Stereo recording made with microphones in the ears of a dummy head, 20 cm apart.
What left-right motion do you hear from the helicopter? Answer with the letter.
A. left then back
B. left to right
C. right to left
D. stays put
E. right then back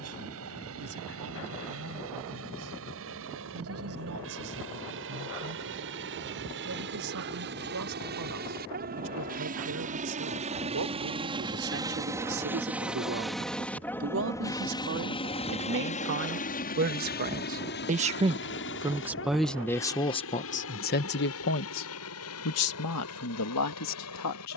C.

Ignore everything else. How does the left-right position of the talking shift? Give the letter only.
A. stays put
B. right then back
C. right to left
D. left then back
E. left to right
C.